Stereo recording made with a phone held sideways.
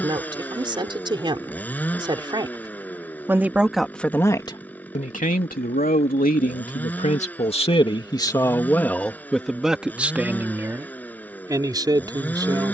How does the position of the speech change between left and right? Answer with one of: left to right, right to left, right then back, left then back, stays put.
left then back.